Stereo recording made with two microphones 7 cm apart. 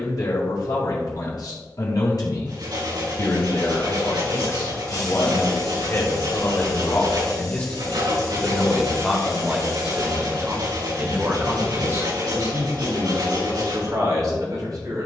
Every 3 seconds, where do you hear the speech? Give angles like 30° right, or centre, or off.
60° left, 50° left, 20° left, 30° right, 60° right.